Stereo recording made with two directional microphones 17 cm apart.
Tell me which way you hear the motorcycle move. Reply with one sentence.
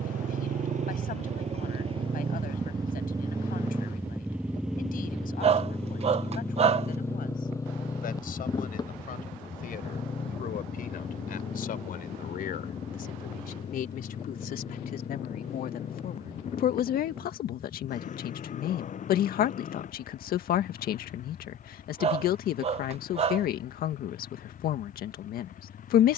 In this clip you hear the motorcycle travel towards the left.